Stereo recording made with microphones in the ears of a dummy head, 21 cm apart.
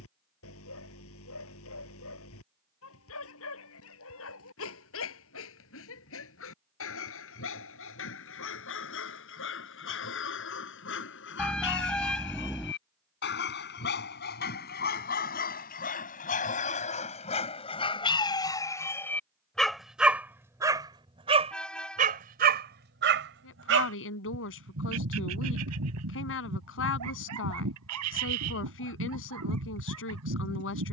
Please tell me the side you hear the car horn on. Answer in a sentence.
You can hear the car horn in the centre.